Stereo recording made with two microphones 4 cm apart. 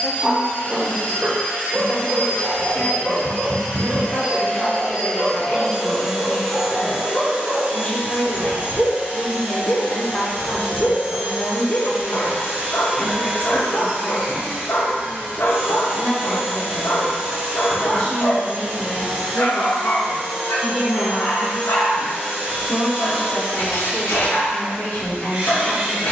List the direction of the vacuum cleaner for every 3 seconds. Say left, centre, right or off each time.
left, left, right, right, right, right, right, right, right.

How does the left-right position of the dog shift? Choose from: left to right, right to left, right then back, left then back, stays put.
right to left.